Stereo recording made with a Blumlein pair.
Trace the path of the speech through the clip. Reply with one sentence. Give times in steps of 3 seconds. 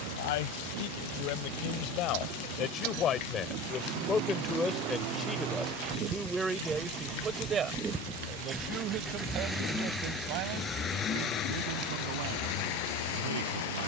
In this clip you hear the speech on the left from 0 s, in the centre from 3 s and on the right from 6 s.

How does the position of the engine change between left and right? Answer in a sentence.
You can hear the engine move from right to left.